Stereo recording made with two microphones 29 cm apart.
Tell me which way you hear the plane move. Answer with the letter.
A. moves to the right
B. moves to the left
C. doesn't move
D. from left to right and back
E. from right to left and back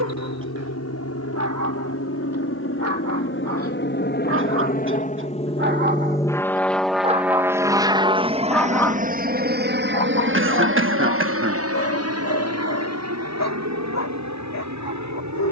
A.